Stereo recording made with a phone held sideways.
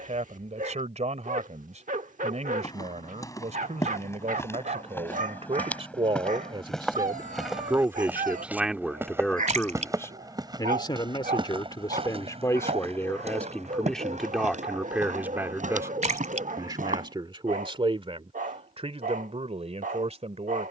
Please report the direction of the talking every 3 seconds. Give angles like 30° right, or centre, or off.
50° right, 50° right, 20° right, 20° left, 10° left, 30° right, 50° right.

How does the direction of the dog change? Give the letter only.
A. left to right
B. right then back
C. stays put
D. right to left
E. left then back
C.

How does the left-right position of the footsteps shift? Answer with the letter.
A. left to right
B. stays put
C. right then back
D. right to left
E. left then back
A.